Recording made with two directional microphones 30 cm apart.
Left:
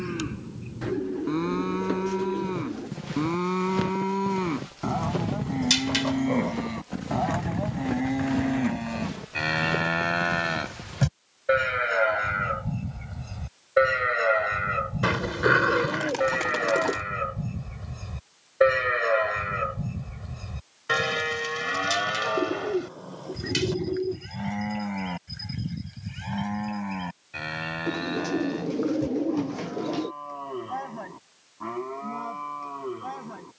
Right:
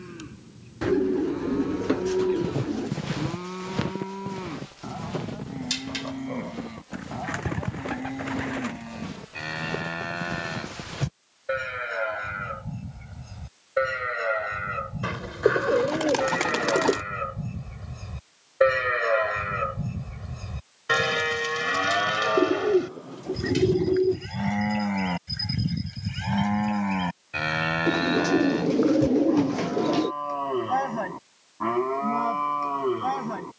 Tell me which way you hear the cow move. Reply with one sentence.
You can hear the cow move from left to right.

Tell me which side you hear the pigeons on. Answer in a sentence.
In this clip you hear the pigeons on the right.